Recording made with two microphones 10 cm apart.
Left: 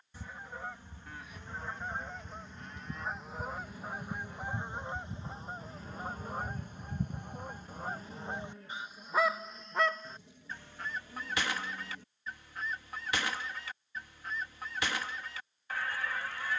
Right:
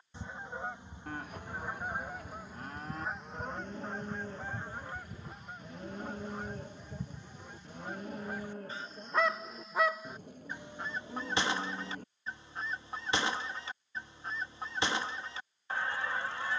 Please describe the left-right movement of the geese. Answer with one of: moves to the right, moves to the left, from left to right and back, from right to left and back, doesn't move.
from right to left and back.